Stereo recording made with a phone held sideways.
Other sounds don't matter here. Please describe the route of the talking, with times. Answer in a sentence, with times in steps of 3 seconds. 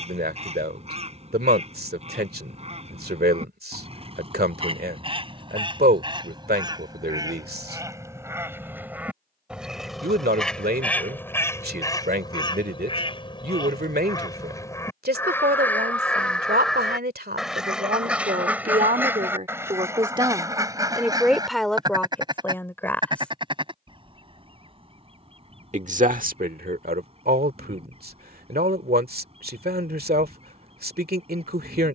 You can hear the talking on the right from 0 s, in the centre from 21 s and on the right from 24 s.